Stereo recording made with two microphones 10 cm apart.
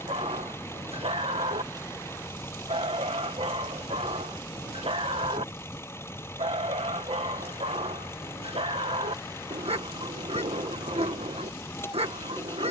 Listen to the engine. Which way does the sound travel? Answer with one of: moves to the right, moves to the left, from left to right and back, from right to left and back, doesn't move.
doesn't move.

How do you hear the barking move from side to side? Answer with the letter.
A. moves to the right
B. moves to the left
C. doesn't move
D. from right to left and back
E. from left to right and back
C.